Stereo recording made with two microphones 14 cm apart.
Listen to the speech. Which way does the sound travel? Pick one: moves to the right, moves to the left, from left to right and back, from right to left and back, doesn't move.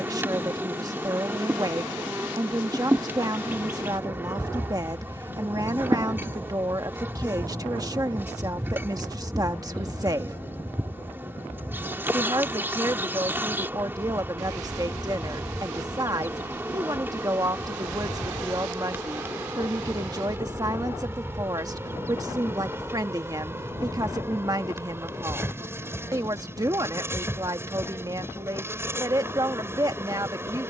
doesn't move.